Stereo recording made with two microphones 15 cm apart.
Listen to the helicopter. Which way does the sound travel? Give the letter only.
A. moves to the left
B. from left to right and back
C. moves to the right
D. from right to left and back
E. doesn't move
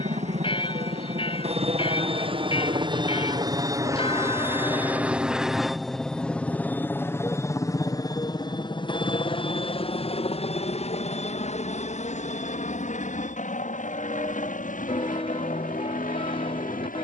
A.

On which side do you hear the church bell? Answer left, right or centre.
left.